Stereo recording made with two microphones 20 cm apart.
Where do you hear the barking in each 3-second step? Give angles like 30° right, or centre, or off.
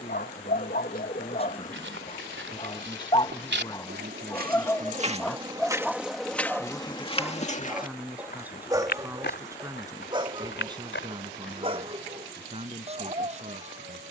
40° left, 10° left, 10° right, 20° right, 30° right.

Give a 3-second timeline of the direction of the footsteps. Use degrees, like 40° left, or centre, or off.
70° right, 40° right, 30° left, 60° left, off.